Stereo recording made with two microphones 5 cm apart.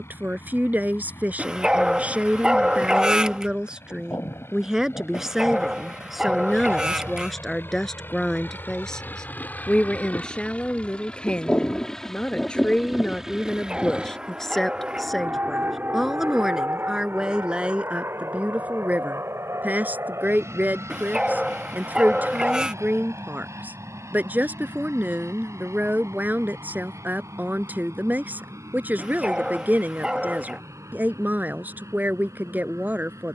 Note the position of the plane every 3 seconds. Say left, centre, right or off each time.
left, left, left, left, centre, right, right, right, right, right, right.